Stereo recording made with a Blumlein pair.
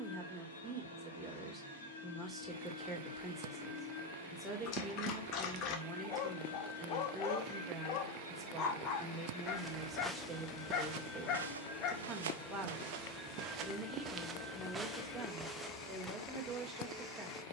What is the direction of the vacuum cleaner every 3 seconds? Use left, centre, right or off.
left, left, left, left, centre, centre.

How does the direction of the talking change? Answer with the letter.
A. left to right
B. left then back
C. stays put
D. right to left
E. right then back
C.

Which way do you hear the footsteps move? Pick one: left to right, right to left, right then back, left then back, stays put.
right then back.